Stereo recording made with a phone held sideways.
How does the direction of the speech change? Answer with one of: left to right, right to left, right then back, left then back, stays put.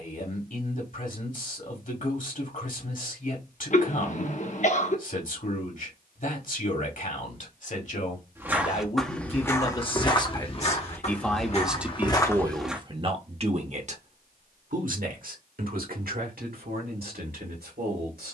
left to right.